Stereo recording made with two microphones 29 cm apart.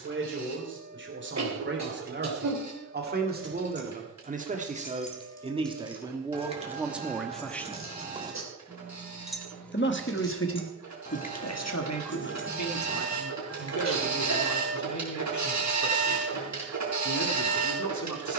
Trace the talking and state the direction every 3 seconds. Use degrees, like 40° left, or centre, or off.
40° right, 30° right, centre, 50° left, 80° left, 80° left.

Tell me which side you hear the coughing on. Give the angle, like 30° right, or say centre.
70° right.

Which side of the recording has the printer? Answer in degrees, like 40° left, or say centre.
70° right.